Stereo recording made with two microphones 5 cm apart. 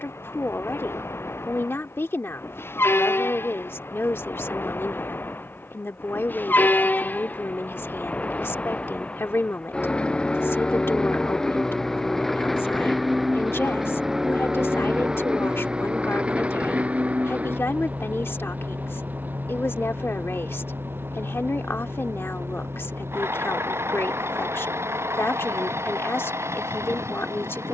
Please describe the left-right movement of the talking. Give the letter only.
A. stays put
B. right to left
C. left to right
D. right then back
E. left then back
A.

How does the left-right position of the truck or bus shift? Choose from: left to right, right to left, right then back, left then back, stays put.
left to right.